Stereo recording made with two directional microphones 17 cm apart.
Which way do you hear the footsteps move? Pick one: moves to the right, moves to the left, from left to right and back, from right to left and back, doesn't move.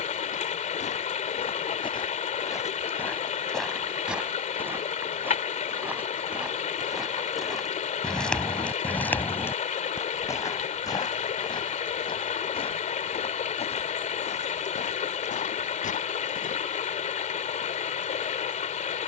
from left to right and back.